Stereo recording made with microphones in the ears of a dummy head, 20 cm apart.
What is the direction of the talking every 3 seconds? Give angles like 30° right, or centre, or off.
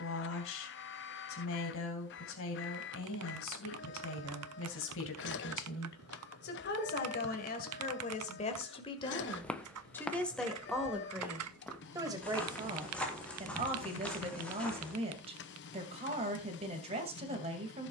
70° left, 60° left, 40° left, centre, 20° right, 30° right.